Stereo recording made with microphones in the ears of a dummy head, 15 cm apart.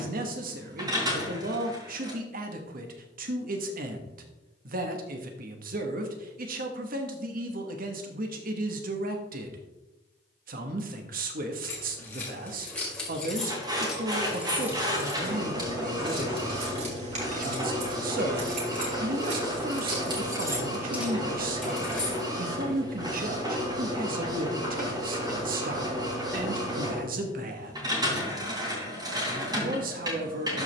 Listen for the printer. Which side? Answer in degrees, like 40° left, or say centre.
20° right.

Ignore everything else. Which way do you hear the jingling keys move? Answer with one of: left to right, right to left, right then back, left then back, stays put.
right then back.